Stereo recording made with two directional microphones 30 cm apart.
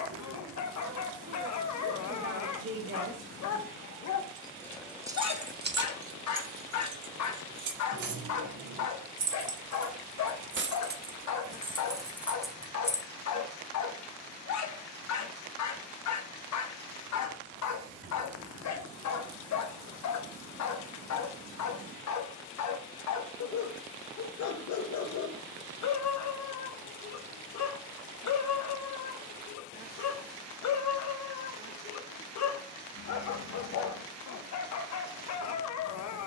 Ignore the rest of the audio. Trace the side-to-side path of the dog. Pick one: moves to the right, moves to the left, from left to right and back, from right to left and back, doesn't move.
doesn't move.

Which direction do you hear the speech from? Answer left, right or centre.
right.